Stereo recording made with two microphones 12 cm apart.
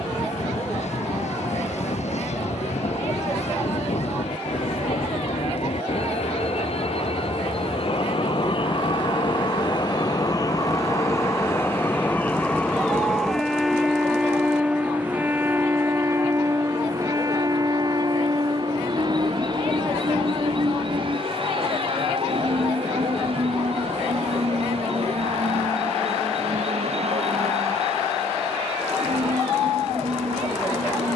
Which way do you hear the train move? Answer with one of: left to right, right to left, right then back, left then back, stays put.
left to right.